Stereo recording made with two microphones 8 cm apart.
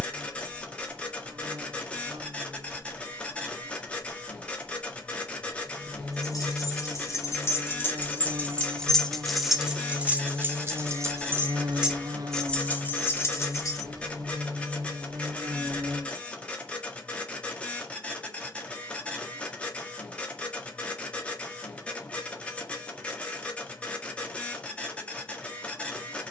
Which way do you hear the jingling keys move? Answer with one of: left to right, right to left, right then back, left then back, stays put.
right then back.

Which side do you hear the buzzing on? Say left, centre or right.
right.